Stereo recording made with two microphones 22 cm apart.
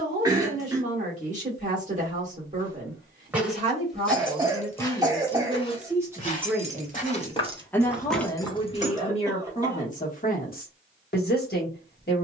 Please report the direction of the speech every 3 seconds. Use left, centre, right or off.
right, right, centre, left.